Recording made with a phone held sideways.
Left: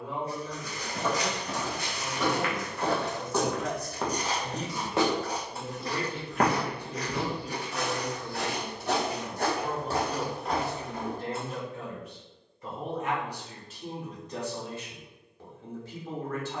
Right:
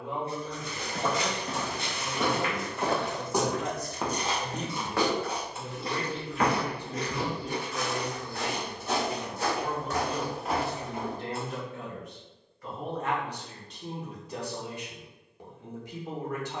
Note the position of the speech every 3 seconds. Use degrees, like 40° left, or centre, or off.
20° right, 10° right, 20° left, 40° left, centre, 20° right.